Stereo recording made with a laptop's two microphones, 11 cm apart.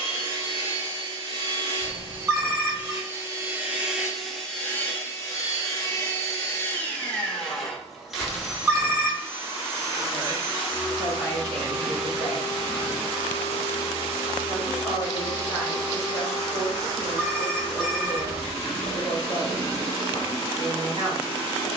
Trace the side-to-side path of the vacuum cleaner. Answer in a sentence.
In this clip you hear the vacuum cleaner move from right to left and back again.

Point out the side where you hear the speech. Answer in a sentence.
You can hear the speech on the right.